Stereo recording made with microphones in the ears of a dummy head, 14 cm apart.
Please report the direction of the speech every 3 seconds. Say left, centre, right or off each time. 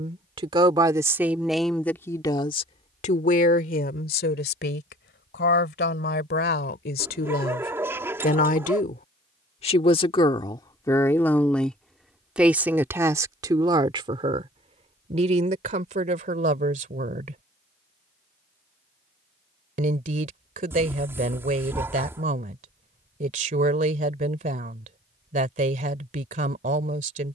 centre, left, left, left, right, right, right, right, right.